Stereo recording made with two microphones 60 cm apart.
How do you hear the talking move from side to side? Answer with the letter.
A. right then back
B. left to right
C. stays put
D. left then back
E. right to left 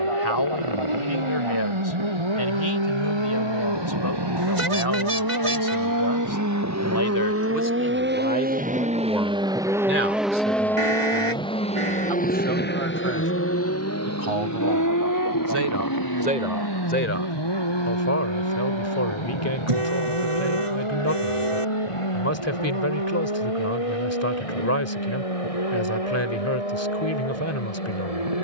A.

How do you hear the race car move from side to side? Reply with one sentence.
In this clip you hear the race car go from the right side to the left.